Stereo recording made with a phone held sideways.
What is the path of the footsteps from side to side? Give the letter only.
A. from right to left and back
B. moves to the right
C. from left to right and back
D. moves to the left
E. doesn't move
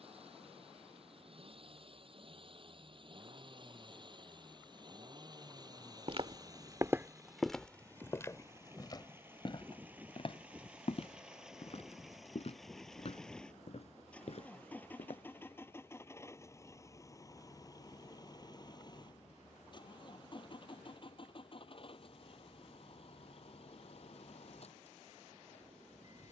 D.